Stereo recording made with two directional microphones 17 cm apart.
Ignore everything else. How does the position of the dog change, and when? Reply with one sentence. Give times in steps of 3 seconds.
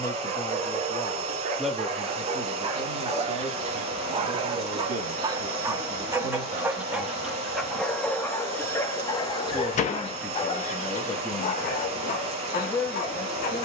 You can hear the dog on the right from 0 s, in the centre from 6 s and on the left from 9 s.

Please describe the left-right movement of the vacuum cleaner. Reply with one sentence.
In this clip you hear the vacuum cleaner stay put.